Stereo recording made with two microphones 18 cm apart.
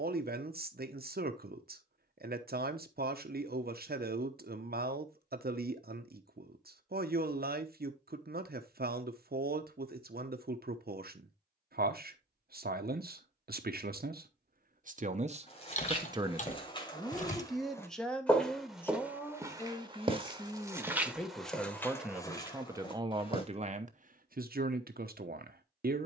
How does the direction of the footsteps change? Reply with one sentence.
You can hear the footsteps go right and come back.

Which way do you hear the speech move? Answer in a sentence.
In this clip you hear the speech move from right to left and back again.